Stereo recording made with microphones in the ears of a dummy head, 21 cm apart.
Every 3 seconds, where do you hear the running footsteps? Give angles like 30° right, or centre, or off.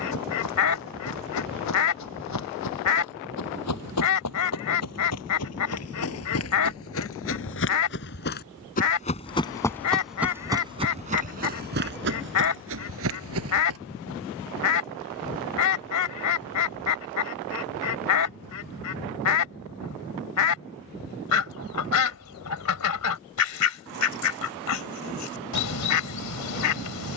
80° left, 70° left, 50° left, 10° right, 60° right, off, off, off, off.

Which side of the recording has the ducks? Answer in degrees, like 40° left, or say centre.
80° left.